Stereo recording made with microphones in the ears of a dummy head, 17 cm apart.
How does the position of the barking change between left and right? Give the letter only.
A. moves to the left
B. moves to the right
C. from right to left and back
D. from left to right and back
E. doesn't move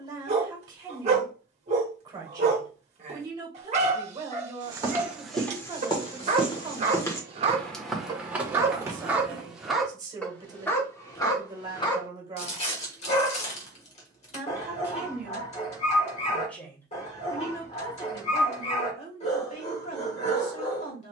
A.